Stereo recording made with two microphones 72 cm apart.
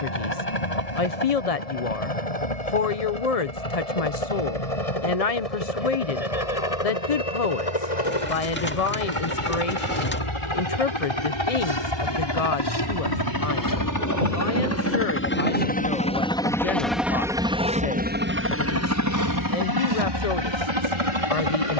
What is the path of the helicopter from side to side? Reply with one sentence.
In this clip you hear the helicopter move from left to right.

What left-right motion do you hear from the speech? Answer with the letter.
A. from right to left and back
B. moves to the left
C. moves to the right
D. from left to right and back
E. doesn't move
E.